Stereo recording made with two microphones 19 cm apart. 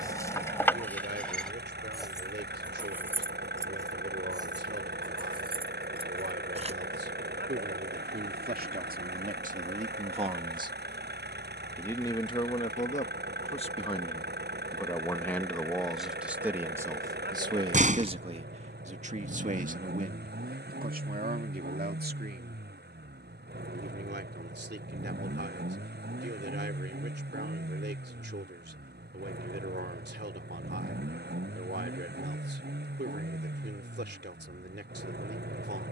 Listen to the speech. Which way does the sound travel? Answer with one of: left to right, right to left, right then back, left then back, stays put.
left then back.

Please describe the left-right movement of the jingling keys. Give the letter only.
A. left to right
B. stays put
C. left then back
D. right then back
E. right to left
A.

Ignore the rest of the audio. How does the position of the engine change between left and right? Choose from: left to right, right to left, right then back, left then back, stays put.
stays put.